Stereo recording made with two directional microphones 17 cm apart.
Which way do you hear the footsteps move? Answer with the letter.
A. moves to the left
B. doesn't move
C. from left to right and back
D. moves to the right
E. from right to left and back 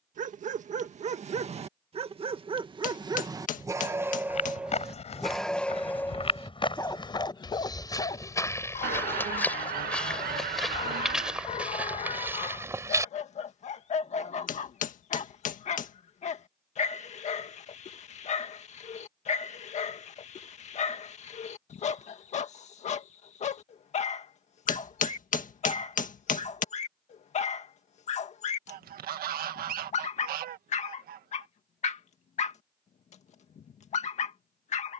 D.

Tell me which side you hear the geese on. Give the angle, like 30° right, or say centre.
60° right.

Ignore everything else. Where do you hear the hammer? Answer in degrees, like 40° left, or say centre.
50° left.